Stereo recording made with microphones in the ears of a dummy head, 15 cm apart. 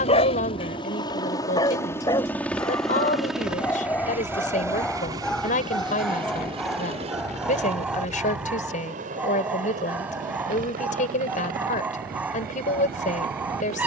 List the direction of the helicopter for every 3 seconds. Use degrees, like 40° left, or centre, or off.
20° left, 10° right, 40° right, 50° right, 50° right.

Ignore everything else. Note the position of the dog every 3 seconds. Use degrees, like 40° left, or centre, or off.
30° left, 10° left, centre, 10° right, 10° right.